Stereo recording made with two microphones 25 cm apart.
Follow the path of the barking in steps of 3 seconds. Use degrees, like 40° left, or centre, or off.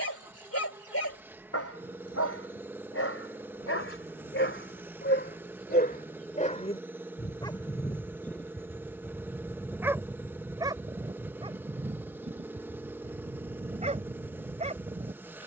60° left, 50° left, 10° left, 10° right, 30° right.